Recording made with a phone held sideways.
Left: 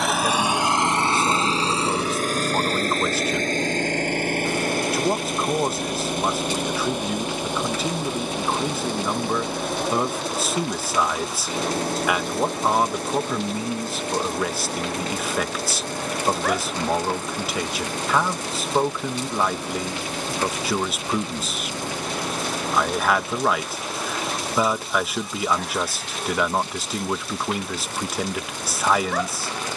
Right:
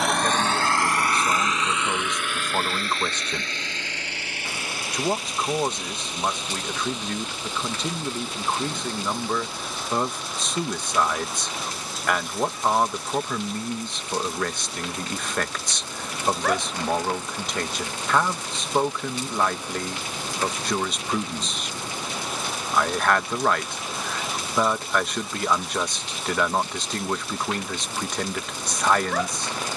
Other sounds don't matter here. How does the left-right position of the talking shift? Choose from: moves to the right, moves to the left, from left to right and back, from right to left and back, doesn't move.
doesn't move.